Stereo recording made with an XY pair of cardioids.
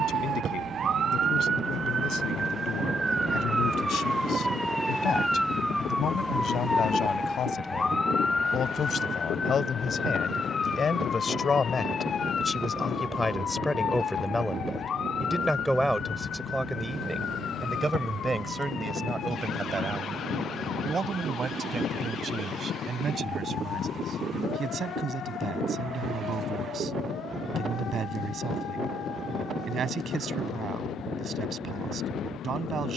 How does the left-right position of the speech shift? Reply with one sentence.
In this clip you hear the speech travel towards the right.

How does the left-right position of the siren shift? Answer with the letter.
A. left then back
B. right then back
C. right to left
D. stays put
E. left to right
C.